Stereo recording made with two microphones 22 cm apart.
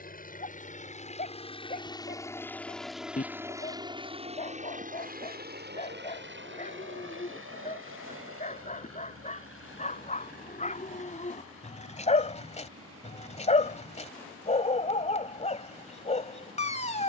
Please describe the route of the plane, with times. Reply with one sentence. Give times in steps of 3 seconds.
In this clip you hear the plane on the left from 0 s and on the right from 3 s.